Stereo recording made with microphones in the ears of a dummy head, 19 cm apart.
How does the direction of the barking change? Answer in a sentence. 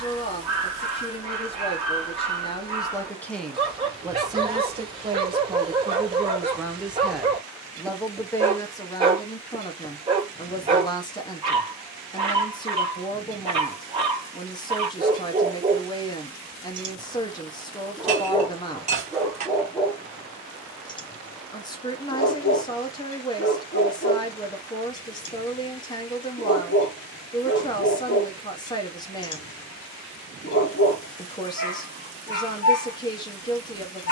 You can hear the barking go from the right side to the left.